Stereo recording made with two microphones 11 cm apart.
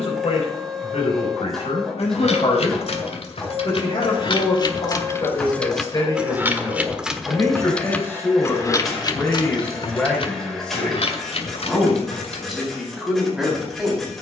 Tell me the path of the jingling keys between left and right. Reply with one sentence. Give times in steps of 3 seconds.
In this clip you hear the jingling keys on the left from 0 s, in the centre from 6 s and on the left from 9 s.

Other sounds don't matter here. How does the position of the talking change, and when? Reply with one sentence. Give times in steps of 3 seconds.
In this clip you hear the talking on the left from 0 s and in the centre from 9 s.